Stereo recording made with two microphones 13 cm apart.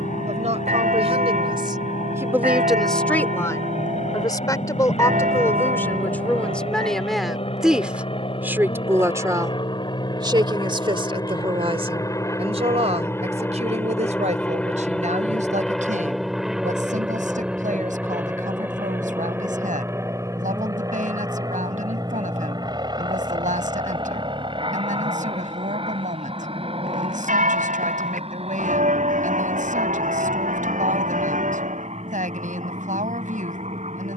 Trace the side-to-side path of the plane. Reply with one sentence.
In this clip you hear the plane travel towards the right.